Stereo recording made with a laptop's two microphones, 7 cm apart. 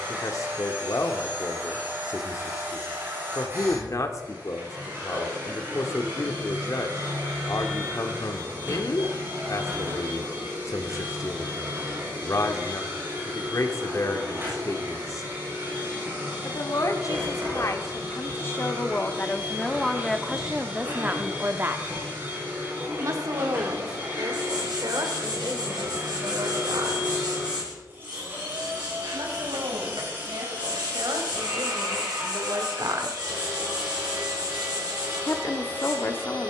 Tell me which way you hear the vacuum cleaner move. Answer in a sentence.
You can hear the vacuum cleaner stay put.